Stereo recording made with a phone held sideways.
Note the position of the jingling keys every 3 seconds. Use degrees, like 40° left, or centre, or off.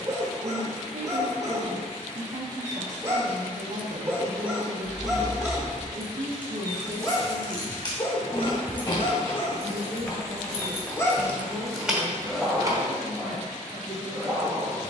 off, 10° right, 30° left, 20° left, 20° right.